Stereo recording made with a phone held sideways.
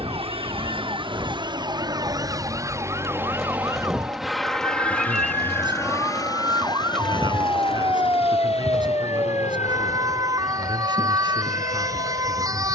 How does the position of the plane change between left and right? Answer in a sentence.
In this clip you hear the plane travel towards the left.